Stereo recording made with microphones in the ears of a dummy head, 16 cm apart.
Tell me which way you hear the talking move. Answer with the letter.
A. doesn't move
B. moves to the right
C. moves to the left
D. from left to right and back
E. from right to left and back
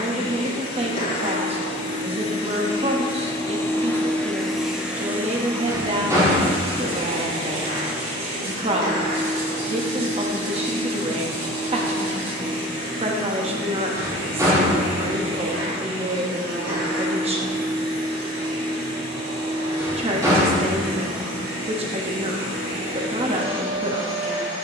A.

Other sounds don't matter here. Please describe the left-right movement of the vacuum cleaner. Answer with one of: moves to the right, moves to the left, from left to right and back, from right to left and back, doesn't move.
moves to the right.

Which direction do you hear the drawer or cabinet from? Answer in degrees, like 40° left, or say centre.
20° right.